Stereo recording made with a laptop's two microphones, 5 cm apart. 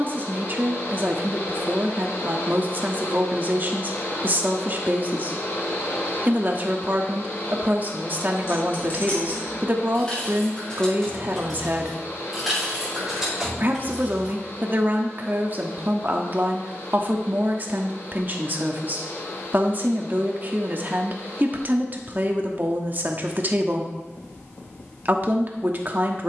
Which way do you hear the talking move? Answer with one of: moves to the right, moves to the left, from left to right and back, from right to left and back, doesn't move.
doesn't move.